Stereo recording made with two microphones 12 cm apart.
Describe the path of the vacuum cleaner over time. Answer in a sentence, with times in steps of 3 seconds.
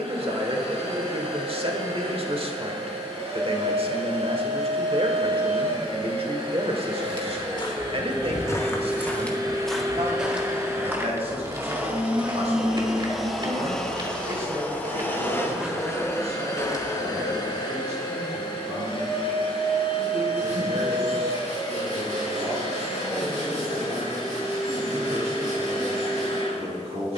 You can hear the vacuum cleaner on the right from 0 s, in the centre from 12 s and on the left from 15 s.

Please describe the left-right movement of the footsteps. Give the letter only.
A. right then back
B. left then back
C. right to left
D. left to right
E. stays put
A.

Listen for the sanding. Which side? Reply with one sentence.
In this clip you hear the sanding on the right.